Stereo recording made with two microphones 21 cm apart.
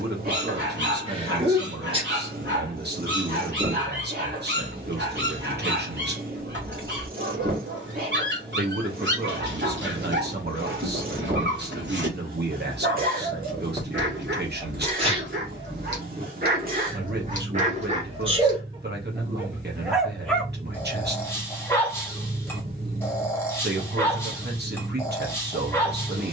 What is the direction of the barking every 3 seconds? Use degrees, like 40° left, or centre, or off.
60° right, 60° right, 60° right, 60° right, 60° right, 50° right, 10° right, 10° left, 10° left.